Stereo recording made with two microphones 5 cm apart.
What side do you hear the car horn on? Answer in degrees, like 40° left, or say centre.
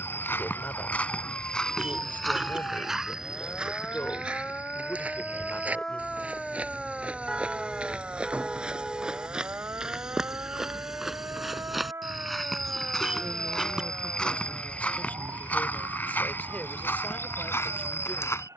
20° right.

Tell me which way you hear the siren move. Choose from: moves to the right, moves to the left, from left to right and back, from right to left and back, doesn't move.
moves to the right.